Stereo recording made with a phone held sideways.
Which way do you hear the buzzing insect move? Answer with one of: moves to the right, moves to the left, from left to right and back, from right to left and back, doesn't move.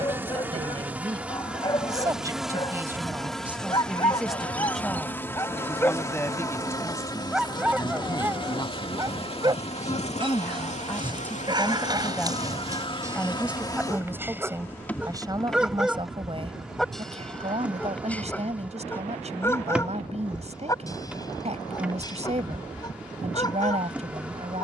from right to left and back.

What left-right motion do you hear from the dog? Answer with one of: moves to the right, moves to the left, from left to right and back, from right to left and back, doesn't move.
from left to right and back.